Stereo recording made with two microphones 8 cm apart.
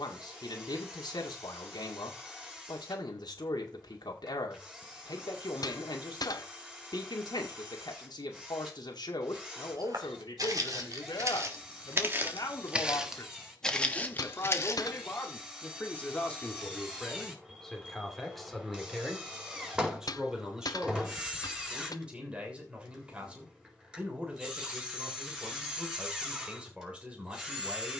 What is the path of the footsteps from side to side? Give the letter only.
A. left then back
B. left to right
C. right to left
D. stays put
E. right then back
C.